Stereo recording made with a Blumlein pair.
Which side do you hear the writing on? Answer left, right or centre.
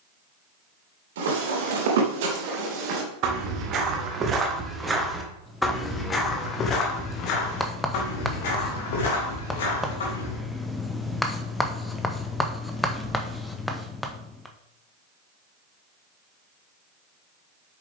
centre.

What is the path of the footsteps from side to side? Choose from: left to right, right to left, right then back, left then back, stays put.
right to left.